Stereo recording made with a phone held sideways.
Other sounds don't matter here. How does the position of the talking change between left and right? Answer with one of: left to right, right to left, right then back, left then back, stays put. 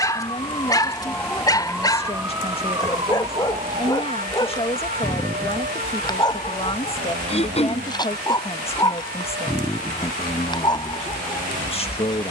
stays put.